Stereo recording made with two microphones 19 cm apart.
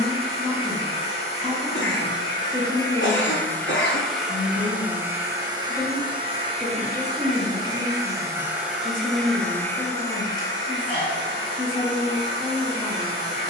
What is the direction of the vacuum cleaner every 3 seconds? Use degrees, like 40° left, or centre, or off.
30° left, centre, 20° right, 20° left, 30° left.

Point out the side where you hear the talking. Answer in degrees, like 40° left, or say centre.
20° left.